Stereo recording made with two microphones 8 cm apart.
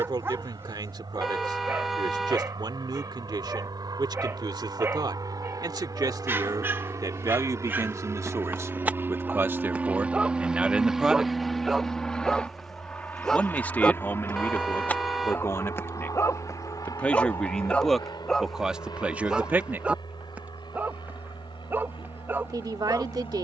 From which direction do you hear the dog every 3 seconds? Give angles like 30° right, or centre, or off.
30° right, 30° right, 30° right, 10° right, 10° left, 30° left, 10° right, 30° right.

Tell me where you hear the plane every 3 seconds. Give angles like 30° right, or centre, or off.
70° right, 60° right, 40° right, 10° right, 20° left, 40° left, 60° left, 60° left.